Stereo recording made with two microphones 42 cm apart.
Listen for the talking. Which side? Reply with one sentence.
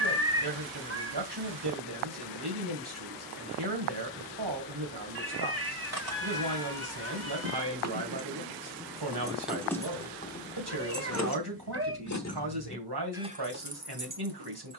In this clip you hear the talking on the right.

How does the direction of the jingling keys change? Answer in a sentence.
In this clip you hear the jingling keys go left and come back.